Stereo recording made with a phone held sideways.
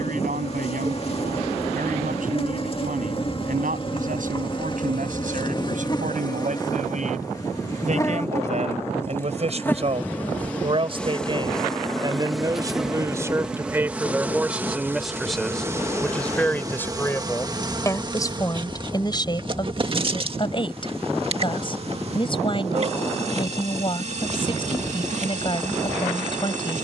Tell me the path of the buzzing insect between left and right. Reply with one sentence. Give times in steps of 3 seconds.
You can hear the buzzing insect on the left from 0 s, in the centre from 9 s and on the right from 15 s.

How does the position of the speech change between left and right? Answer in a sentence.
In this clip you hear the speech move from right to left.